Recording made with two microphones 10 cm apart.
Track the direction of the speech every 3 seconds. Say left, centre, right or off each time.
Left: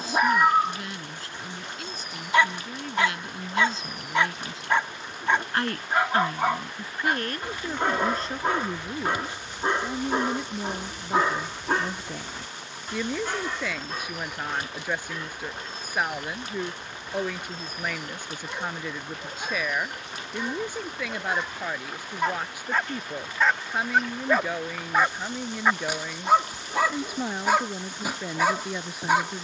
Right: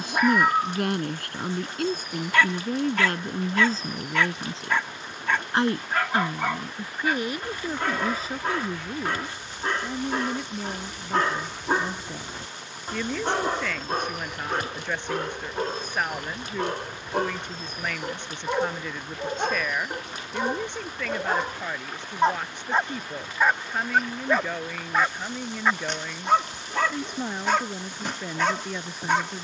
right, right, centre, centre, centre, centre, centre, centre, centre, centre.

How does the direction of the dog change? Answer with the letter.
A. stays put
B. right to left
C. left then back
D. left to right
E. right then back
E.